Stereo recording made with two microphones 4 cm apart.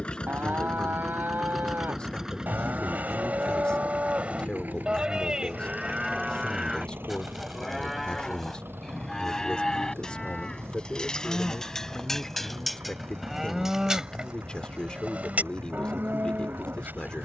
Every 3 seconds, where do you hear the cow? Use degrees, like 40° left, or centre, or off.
60° right, 30° right, centre, 20° left, 10° right, 50° right.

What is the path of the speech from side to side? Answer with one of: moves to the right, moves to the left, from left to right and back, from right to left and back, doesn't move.
doesn't move.